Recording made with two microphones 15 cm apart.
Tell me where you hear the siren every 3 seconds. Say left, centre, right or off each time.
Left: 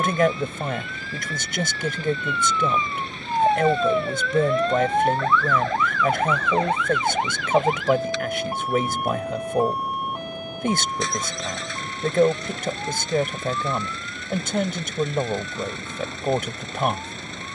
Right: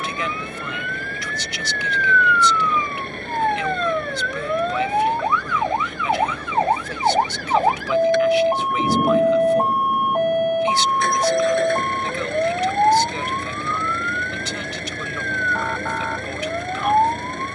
left, centre, right, right, right, right.